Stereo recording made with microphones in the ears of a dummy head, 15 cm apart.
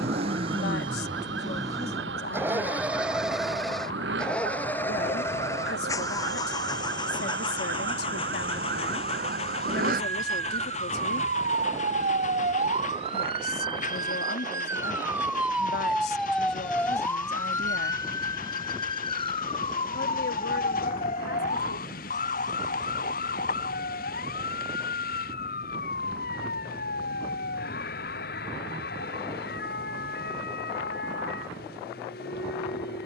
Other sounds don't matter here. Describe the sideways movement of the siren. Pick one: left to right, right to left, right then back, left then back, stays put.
right to left.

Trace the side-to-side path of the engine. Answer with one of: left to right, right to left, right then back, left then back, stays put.
right to left.